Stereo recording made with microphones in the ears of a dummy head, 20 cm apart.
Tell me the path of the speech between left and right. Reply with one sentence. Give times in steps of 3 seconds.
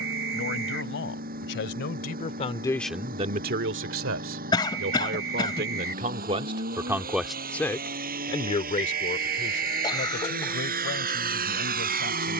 In this clip you hear the speech on the left from 0 s, on the right from 3 s, in the centre from 6 s and on the left from 9 s.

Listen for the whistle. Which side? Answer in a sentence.
In this clip you hear the whistle on the right.